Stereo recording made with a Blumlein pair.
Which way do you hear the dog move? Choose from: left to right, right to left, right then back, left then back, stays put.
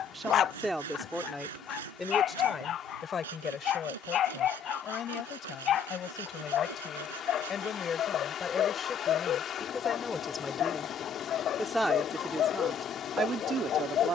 stays put.